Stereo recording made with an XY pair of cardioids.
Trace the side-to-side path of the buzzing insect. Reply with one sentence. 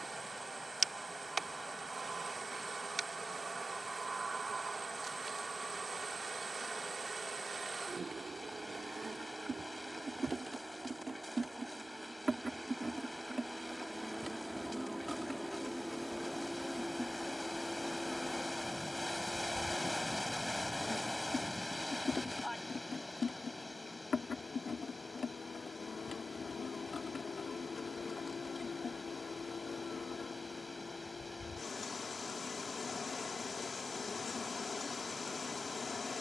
You can hear the buzzing insect go from the right side to the left.